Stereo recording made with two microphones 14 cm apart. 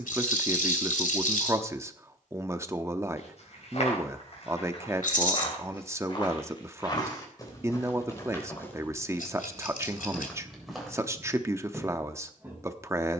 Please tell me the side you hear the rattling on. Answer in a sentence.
You can hear the rattling on the left.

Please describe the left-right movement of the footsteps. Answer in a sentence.
You can hear the footsteps move from left to right.